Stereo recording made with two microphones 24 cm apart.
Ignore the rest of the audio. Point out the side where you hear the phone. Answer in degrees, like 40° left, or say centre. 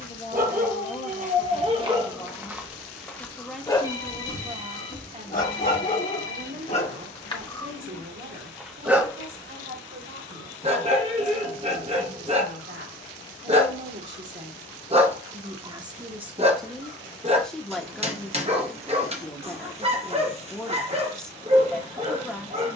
60° left.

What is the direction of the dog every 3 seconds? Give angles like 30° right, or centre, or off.
20° right, 20° left, 20° left, 20° right, 30° right, 30° right, 30° right, 30° right.